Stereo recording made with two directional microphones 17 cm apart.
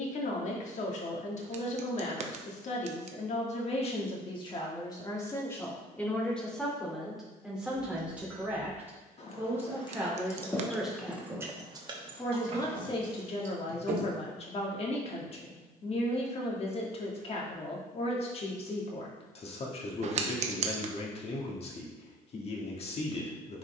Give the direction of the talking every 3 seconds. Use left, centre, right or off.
left, left, centre, centre, left, left, left, left.